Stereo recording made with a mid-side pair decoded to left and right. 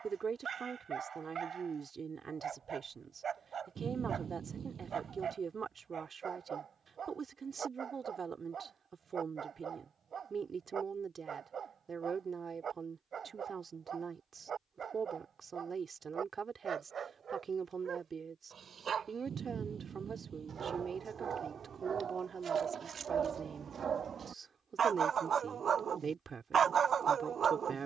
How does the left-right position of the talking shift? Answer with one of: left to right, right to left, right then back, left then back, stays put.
stays put.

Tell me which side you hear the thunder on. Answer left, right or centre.
right.